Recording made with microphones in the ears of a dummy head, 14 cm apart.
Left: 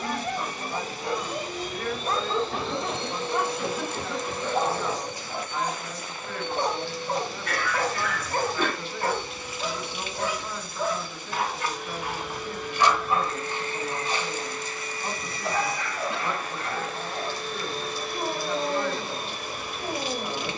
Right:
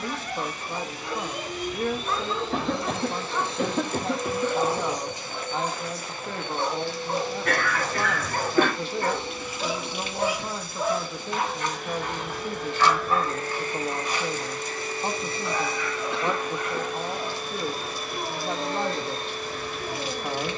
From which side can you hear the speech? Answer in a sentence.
You can hear the speech on the right.